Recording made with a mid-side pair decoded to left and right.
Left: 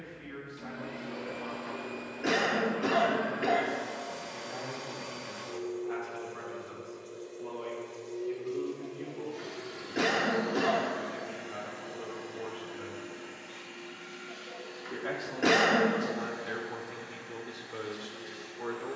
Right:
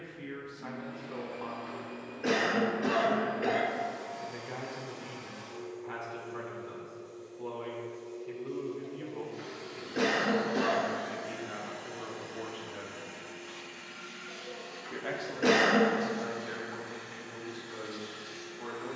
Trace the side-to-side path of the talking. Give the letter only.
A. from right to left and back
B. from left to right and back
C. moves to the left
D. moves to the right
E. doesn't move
C.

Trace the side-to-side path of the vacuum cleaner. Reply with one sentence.
In this clip you hear the vacuum cleaner go from the left side to the right.